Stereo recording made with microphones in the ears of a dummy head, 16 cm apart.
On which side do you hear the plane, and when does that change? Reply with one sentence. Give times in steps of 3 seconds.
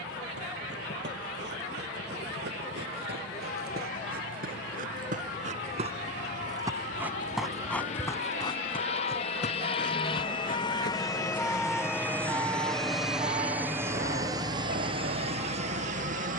In this clip you hear the plane on the left from 0 s, in the centre from 12 s and on the right from 15 s.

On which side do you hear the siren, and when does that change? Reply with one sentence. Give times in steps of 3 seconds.
You can hear the siren on the left from 0 s and on the right from 12 s.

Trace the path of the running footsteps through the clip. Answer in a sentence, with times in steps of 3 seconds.
In this clip you hear the running footsteps on the right from 0 s, in the centre from 6 s, on the left from 9 s and not at all from 12 s.